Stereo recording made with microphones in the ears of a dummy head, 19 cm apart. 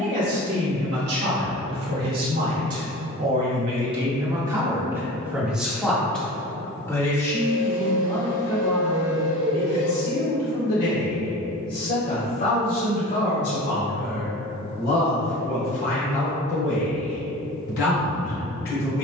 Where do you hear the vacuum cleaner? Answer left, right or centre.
left.